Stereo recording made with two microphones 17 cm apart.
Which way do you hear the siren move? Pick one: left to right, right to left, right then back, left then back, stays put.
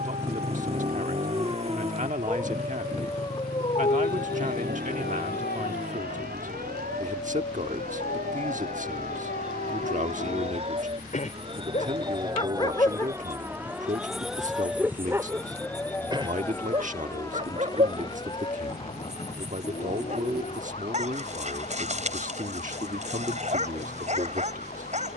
right to left.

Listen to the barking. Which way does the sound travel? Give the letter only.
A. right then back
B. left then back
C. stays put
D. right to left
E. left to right
B.